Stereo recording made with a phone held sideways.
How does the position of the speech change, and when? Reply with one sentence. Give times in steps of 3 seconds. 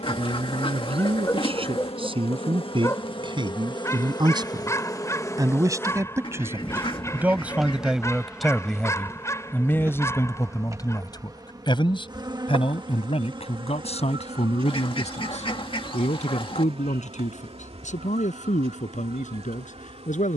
You can hear the speech on the right from 0 s, in the centre from 6 s and on the left from 9 s.